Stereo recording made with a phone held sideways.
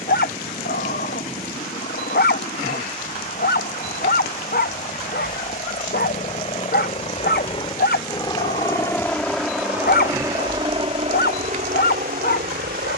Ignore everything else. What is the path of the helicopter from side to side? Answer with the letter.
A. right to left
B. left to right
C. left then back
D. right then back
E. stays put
B.